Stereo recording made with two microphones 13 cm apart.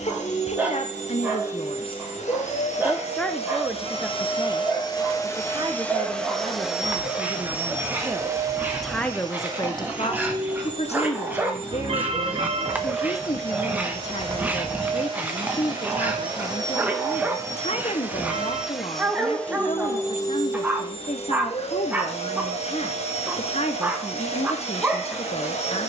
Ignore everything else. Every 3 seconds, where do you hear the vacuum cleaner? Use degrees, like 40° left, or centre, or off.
70° left, 40° left, 10° right, 40° right, 40° right, 30° right, 10° left, 60° left, 60° left.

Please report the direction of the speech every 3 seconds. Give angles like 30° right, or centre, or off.
50° left, 10° right, 20° right, 40° left, 60° left, 60° left, 60° left, 60° left, 60° left.